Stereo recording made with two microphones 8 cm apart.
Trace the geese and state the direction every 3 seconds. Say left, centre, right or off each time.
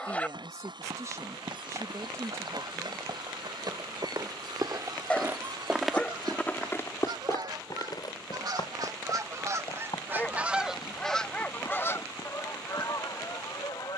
right, right, right, centre, left.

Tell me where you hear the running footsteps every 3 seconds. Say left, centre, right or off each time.
right, right, left, left, left.